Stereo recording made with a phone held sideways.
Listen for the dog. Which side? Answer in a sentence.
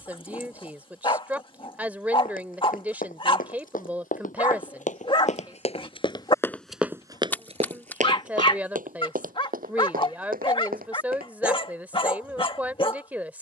In this clip you hear the dog on the left.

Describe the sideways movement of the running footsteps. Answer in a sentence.
You can hear the running footsteps move to the right.